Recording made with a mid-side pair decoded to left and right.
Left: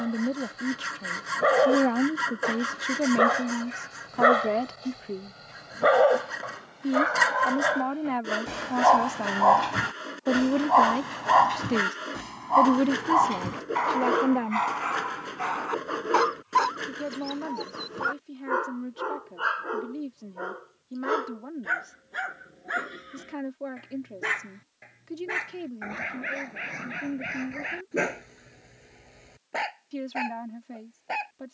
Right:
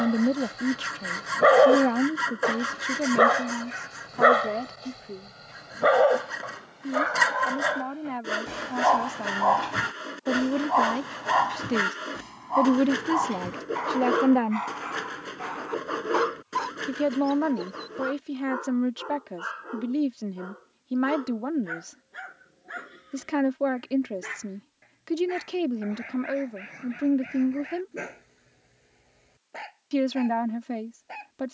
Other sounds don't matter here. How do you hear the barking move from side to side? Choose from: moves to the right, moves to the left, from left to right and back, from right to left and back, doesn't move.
moves to the left.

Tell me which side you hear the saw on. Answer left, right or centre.
centre.